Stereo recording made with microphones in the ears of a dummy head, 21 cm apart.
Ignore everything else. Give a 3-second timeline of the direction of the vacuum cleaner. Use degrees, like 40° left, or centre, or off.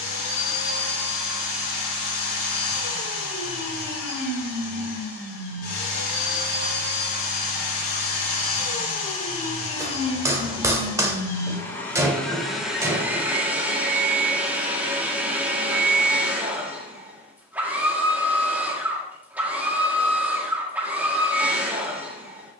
50° left, 50° left, 40° left, 20° left, centre, 10° right, 10° right, 10° right.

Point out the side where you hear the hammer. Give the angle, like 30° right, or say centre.
10° right.